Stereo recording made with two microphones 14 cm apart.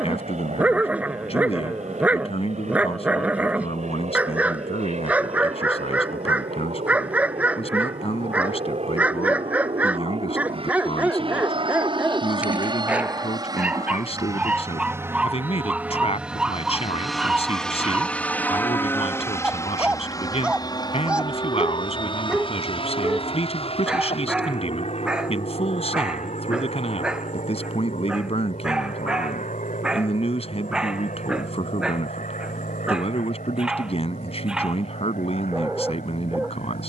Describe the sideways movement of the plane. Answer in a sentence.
In this clip you hear the plane move to the left.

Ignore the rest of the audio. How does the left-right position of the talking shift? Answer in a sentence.
You can hear the talking stay in one place.